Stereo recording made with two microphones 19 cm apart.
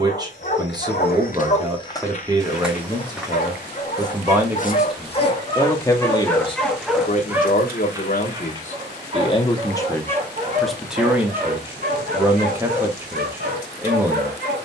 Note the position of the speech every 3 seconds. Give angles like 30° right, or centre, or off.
20° right, 10° right, 40° left, 10° left, 10° right.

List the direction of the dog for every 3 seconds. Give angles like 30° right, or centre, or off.
40° left, 30° left, 10° right, 40° right, 50° right.